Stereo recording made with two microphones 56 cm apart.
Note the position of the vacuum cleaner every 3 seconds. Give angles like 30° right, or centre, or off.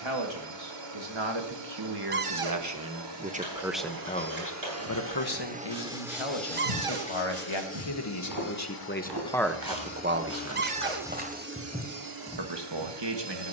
50° right, 30° right, 20° left, 10° left, 50° right.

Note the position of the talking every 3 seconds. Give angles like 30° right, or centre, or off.
40° right, 20° left, 50° left, 10° right, 50° right.